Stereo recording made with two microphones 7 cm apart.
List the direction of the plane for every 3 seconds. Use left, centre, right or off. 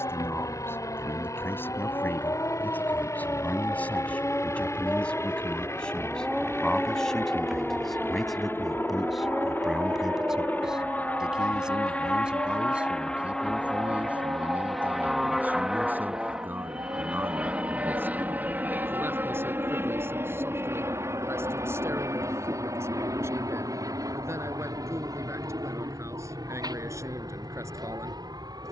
left, left, left, left, centre, centre, right, right, right, right.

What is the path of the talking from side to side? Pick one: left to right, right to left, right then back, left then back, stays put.
left to right.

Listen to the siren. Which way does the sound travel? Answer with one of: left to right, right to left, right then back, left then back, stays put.
left to right.